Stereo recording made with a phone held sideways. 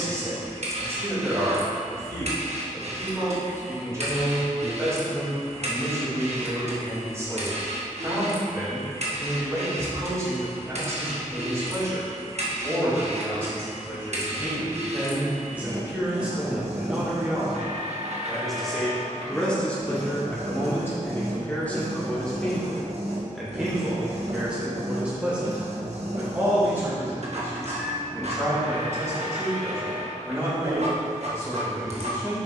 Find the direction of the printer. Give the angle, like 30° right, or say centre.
50° right.